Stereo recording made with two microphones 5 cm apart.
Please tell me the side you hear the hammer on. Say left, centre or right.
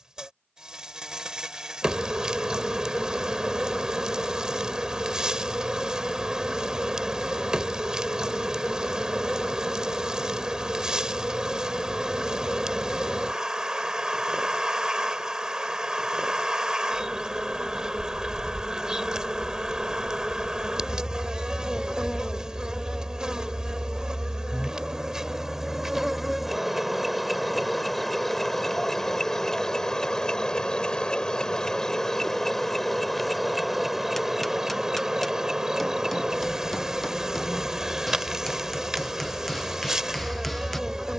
centre.